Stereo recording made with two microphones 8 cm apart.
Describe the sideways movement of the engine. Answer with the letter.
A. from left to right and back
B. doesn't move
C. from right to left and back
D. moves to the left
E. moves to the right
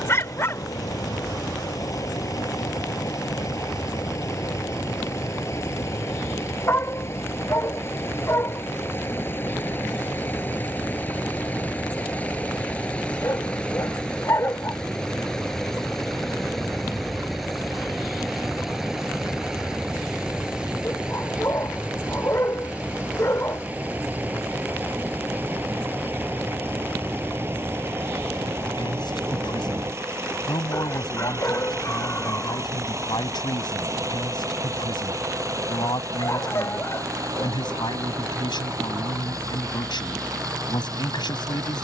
E.